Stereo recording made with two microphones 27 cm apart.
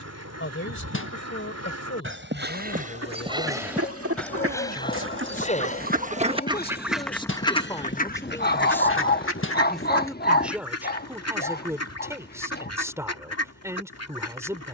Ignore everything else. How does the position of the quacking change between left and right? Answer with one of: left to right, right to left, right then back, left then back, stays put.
right to left.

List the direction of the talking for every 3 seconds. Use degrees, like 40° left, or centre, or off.
50° left, 40° left, 20° left, 10° right, 10° right.